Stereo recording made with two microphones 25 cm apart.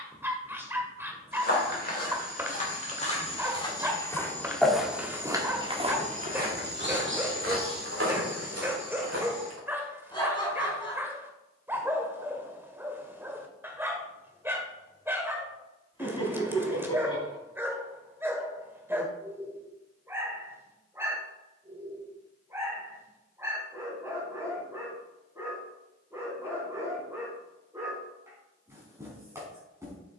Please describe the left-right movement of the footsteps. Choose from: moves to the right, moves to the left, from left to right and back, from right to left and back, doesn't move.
moves to the right.